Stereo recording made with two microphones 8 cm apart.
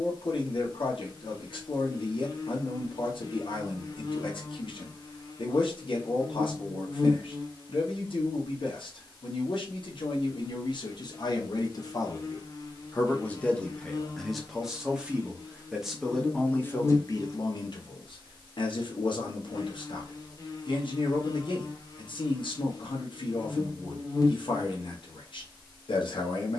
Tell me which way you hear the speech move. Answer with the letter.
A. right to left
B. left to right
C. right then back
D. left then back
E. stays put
C.